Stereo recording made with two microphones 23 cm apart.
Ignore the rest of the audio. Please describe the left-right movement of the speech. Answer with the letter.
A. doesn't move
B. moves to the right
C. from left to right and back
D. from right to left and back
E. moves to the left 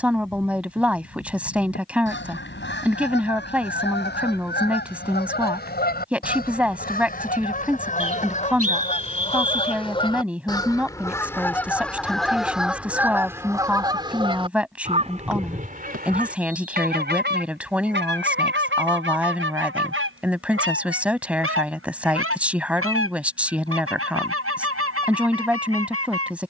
A.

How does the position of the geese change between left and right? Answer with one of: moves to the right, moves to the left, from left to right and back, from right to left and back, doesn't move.
moves to the right.